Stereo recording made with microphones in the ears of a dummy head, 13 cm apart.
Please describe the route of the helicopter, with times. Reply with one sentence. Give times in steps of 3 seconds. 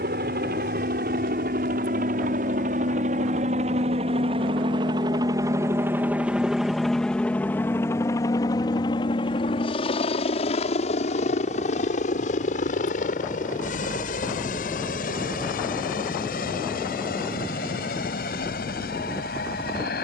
In this clip you hear the helicopter on the right from 0 s, in the centre from 6 s and on the left from 9 s.